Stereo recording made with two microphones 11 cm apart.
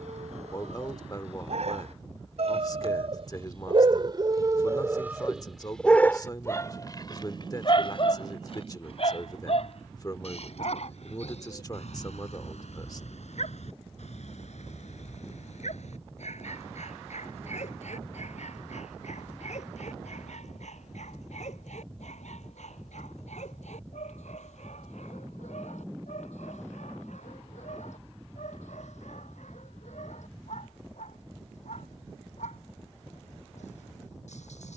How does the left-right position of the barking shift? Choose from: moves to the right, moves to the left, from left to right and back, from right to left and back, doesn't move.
moves to the left.